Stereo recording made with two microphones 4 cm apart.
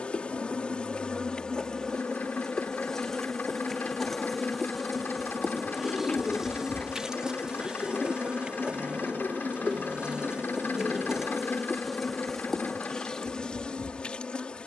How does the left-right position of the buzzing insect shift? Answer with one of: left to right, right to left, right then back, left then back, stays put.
right then back.